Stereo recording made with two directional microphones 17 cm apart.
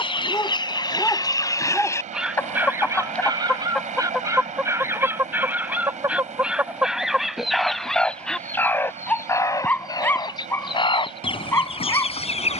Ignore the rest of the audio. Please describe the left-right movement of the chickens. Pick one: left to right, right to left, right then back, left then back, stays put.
right then back.